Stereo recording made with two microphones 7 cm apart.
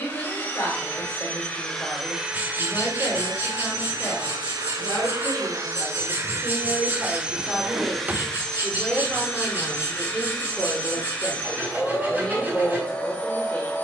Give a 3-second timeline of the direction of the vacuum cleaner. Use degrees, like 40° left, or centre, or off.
10° left, 60° right, 10° right, 20° left, 20° left.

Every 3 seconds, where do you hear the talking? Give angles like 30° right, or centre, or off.
30° left, 30° left, 10° left, centre, 20° left.